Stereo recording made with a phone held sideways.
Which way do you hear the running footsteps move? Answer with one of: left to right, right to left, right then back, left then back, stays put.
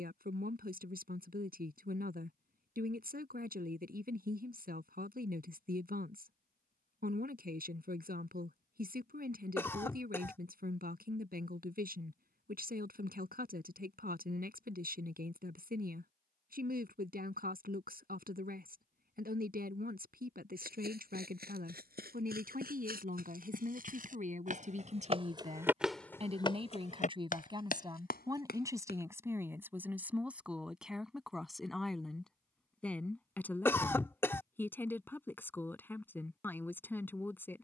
right to left.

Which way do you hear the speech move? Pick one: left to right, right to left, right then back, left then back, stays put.
right to left.